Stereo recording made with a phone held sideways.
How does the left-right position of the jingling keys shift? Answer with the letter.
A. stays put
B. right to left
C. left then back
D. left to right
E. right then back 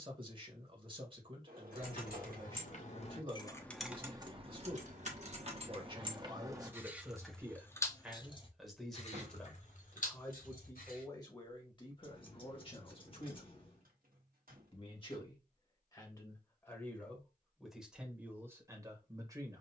E.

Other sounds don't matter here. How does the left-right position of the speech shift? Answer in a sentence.
You can hear the speech move from right to left and back again.